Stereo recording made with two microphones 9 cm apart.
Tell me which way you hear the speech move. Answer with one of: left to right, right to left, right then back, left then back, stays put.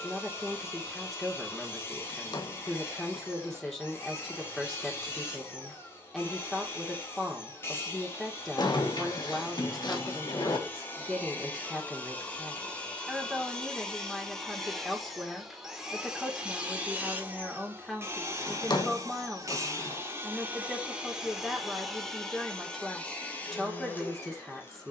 stays put.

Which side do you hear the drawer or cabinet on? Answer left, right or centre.
left.